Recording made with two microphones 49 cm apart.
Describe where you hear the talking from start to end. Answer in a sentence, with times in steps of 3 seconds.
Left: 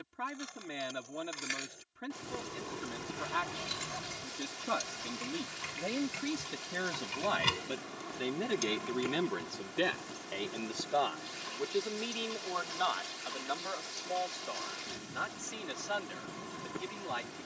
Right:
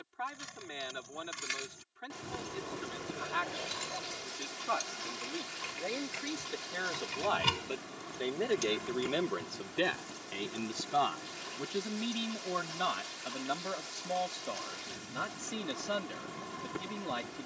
In this clip you hear the talking on the left from 0 s, in the centre from 9 s and on the right from 12 s.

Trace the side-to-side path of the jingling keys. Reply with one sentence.
You can hear the jingling keys move from right to left and back again.